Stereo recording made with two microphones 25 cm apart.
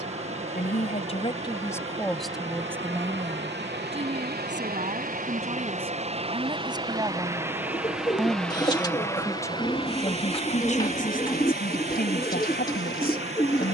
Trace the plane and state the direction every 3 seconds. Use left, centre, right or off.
right, right, centre, left, left.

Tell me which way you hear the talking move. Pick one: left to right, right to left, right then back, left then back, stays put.
right then back.